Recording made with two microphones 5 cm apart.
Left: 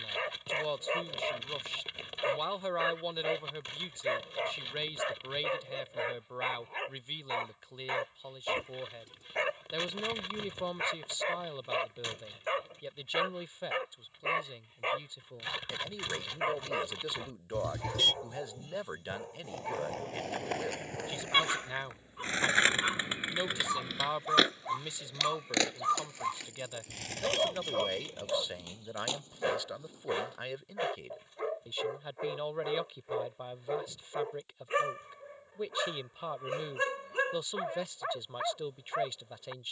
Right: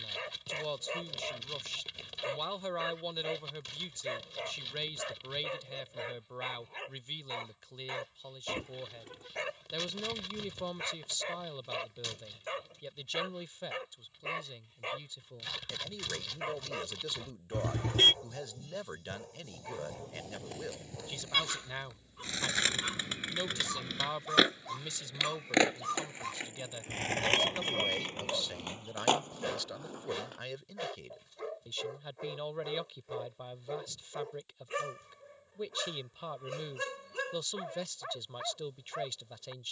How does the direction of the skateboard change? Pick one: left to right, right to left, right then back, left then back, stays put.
left to right.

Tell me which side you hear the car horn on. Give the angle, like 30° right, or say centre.
40° right.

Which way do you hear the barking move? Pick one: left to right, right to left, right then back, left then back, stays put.
stays put.